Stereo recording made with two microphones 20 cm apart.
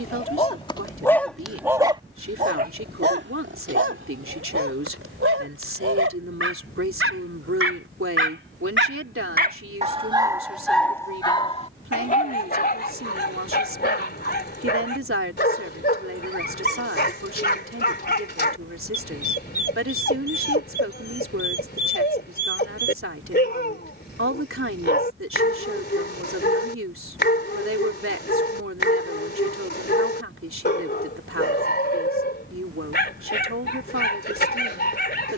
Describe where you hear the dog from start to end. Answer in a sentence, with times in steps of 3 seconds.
You can hear the dog in the centre from 0 s, on the right from 3 s, in the centre from 9 s and on the left from 12 s.